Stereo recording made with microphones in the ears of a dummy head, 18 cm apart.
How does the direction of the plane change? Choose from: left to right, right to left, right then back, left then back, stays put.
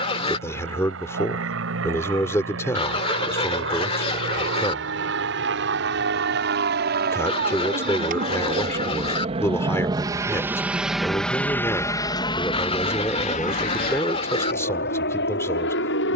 right to left.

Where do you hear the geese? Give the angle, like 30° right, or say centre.
30° left.